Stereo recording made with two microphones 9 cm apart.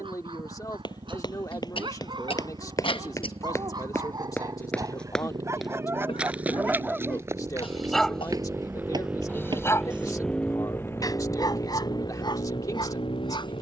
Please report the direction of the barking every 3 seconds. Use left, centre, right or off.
right, right, centre, left, left.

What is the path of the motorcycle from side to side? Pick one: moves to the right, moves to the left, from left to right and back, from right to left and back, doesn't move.
moves to the left.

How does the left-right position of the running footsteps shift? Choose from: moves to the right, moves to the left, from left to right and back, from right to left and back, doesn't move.
moves to the right.